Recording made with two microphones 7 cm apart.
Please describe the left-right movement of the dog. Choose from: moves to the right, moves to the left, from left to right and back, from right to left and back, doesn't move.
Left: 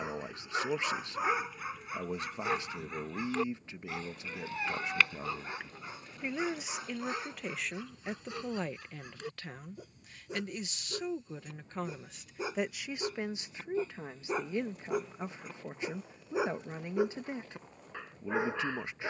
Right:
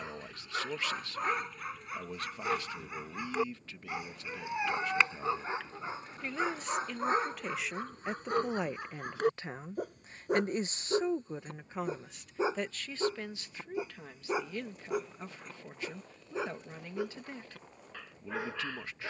from left to right and back.